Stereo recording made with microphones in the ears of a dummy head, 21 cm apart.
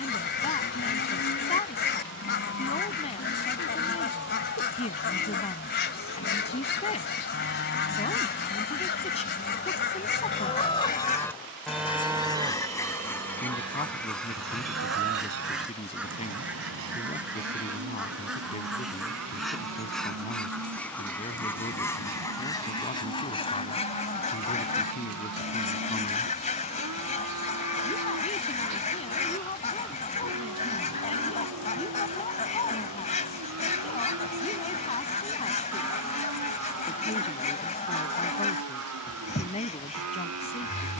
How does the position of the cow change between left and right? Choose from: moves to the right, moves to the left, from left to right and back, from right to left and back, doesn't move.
moves to the right.